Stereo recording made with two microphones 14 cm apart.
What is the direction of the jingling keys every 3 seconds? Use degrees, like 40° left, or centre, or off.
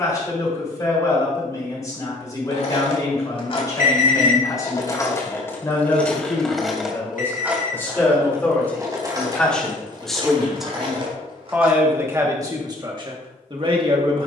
50° left, 30° left, 10° right, 40° right, off.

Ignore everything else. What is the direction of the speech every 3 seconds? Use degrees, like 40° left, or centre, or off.
30° left, 30° left, 20° left, centre, 30° right.